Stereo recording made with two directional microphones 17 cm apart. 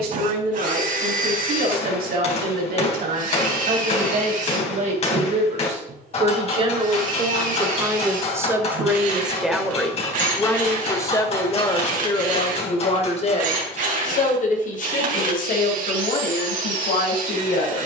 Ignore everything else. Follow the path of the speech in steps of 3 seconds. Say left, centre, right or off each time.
right, right, right, centre, left, left.